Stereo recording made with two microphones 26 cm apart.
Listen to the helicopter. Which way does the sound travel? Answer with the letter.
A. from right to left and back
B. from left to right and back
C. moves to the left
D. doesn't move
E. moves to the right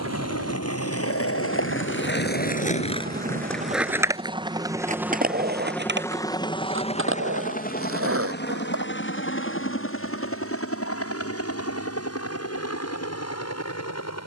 C.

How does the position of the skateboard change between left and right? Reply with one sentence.
You can hear the skateboard go from the left side to the right.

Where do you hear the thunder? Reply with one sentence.
You can hear the thunder on the left.